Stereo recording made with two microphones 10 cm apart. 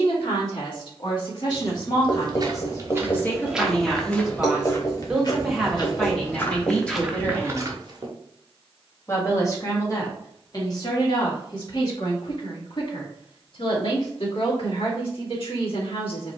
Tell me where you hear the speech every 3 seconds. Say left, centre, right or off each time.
left, centre, centre, left, left, left.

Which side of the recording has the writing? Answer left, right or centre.
left.